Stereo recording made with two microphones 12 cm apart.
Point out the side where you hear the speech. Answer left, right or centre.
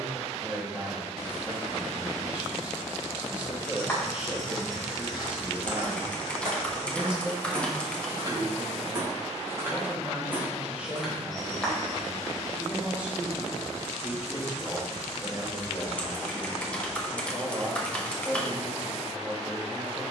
centre.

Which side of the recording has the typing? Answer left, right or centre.
centre.